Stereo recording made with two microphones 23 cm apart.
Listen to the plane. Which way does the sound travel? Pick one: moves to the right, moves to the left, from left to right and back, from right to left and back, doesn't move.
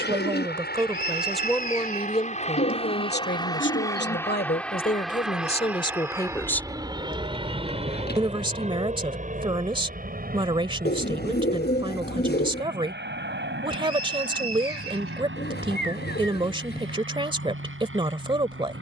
moves to the right.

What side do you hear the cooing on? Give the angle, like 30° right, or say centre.
50° left.